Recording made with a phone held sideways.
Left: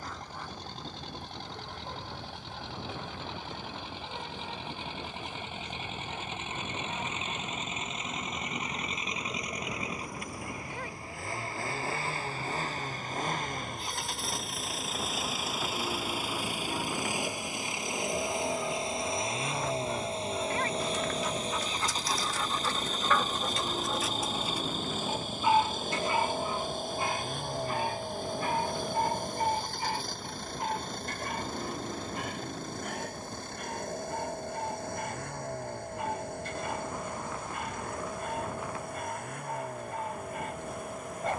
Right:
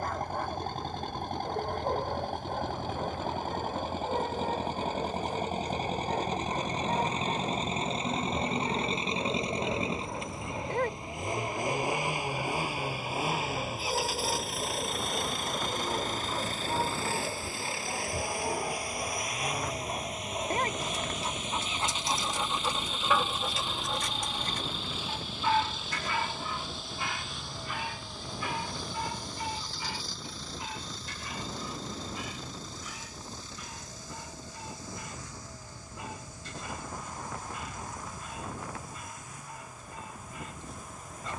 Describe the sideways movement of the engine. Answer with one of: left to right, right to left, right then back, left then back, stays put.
right to left.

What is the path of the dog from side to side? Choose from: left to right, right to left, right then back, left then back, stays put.
right to left.